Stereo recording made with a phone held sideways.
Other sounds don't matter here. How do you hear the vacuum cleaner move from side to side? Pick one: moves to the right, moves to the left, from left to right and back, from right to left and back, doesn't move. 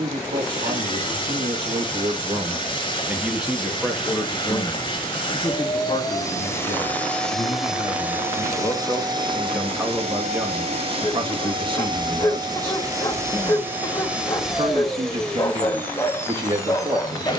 from left to right and back.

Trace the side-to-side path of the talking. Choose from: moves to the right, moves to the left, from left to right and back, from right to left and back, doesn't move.
from right to left and back.